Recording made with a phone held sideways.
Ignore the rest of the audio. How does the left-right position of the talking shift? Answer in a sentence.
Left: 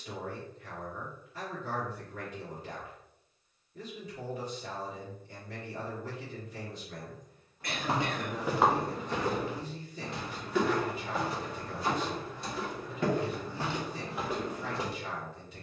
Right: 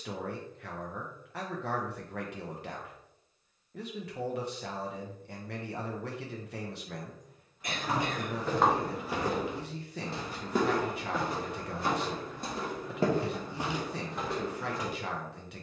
You can hear the talking stay in one place.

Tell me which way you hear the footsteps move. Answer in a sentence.
In this clip you hear the footsteps move from left to right and back again.